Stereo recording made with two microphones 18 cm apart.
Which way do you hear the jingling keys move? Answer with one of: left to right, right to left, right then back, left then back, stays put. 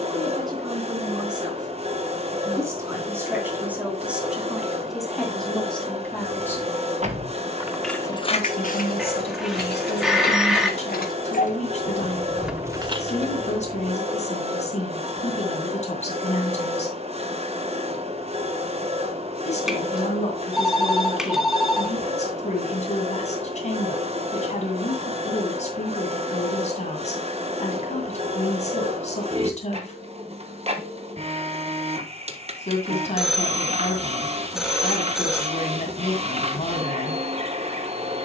left then back.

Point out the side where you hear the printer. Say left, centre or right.
right.